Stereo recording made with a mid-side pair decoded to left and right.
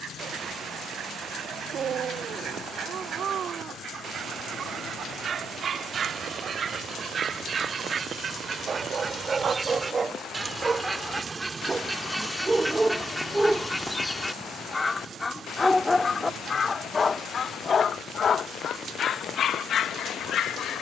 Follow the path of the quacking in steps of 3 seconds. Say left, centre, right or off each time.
right, right, right, right, centre, left, left.